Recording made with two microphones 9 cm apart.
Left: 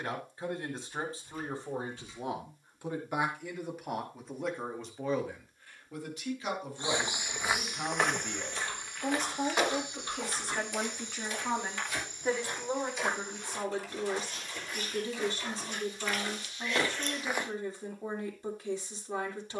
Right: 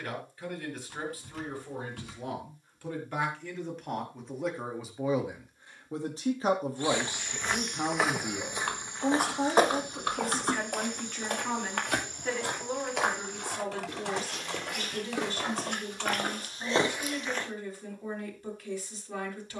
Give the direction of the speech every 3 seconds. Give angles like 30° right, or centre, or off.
30° left, centre, 30° right, centre, 20° left, 20° left, 20° left.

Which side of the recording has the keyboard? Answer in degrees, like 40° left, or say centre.
70° right.